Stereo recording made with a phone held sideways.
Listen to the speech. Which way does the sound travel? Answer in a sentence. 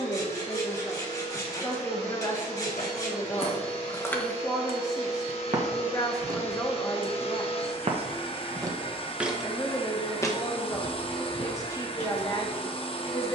In this clip you hear the speech stay put.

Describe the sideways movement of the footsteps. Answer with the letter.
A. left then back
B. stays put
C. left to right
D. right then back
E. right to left
D.